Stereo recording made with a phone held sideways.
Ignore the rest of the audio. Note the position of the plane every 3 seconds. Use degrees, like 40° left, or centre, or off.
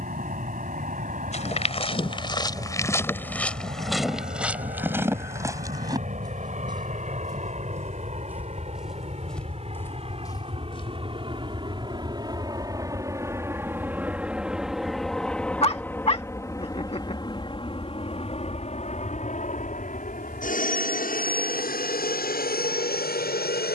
60° right, 60° right, 50° right, 40° right, 20° right, 20° left, 50° left, 60° left.